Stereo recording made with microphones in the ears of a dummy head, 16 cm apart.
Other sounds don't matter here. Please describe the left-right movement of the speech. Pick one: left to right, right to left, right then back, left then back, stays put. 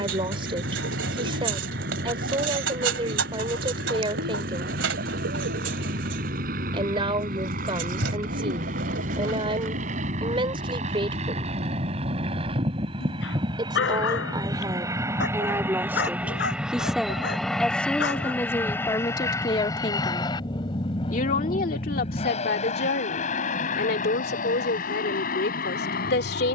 right to left.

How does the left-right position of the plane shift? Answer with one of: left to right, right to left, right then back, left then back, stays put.
right to left.